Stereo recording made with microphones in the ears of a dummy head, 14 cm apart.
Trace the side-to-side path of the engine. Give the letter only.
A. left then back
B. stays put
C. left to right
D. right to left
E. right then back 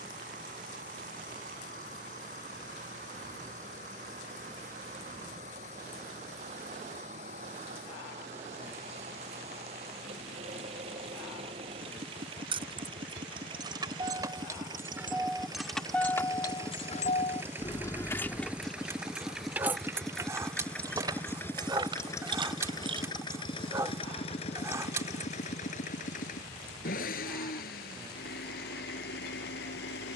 D.